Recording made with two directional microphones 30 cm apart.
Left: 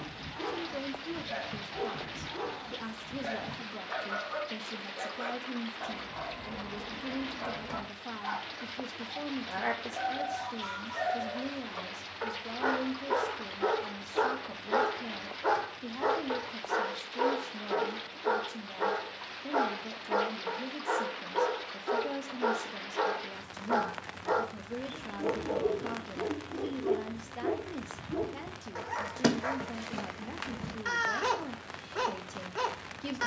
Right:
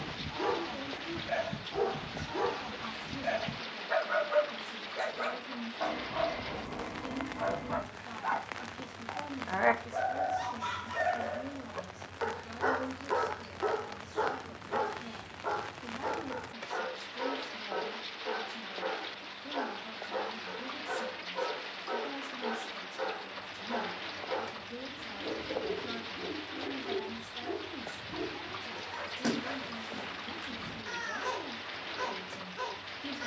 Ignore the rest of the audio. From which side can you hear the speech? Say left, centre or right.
left.